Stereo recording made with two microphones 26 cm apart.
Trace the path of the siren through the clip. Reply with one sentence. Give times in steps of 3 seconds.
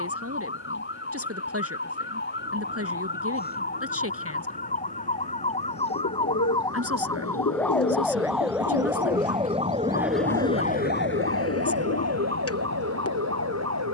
In this clip you hear the siren on the left from 0 s, in the centre from 6 s and on the right from 9 s.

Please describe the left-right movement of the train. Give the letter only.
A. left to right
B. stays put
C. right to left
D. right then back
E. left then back
C.